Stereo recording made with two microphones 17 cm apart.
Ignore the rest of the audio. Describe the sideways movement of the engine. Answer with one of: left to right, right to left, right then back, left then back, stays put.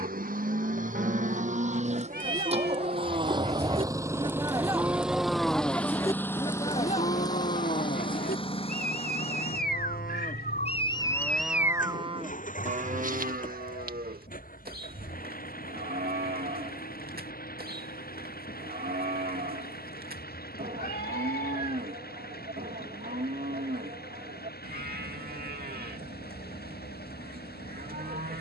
right to left.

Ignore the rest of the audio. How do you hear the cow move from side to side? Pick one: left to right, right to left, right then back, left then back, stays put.
left then back.